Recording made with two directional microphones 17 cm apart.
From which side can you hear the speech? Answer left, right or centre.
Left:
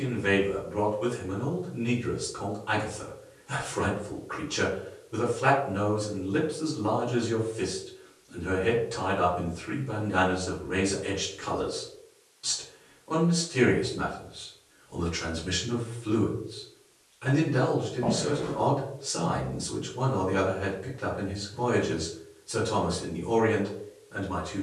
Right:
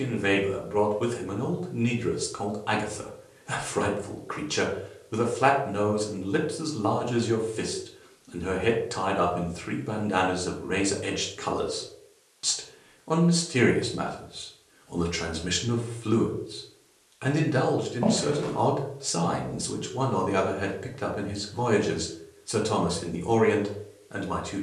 right.